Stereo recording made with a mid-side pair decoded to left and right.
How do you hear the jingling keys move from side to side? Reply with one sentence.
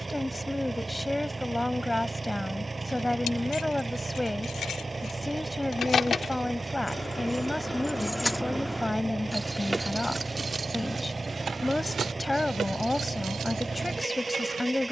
You can hear the jingling keys go from the left side to the right.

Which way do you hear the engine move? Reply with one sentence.
You can hear the engine stay in one place.